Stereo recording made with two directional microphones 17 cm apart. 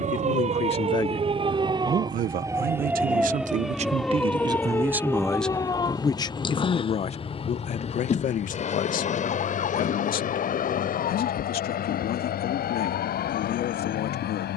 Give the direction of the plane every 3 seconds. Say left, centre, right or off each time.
right, centre, left, left, left.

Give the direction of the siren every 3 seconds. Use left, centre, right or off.
right, centre, left, left, left.